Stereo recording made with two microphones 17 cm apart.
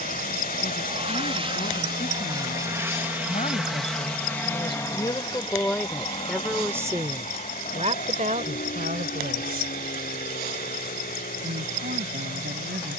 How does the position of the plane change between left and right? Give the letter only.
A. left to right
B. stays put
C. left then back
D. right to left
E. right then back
D.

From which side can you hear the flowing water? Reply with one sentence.
In this clip you hear the flowing water on the left.